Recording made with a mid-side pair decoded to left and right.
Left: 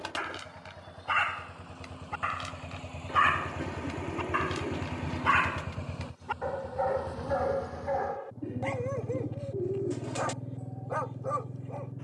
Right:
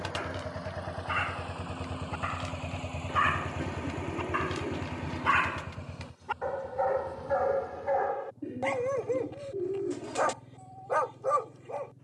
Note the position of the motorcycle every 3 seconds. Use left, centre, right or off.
right, centre, left, left.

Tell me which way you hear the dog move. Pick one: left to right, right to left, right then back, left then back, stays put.
left to right.